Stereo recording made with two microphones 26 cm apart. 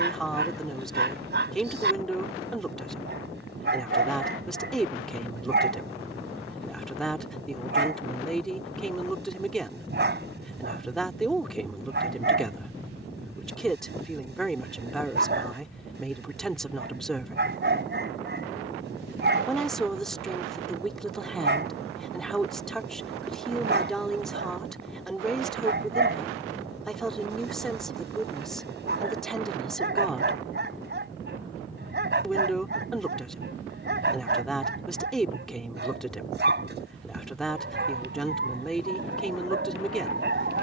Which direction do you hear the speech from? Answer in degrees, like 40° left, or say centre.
centre.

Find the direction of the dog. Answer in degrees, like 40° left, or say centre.
40° right.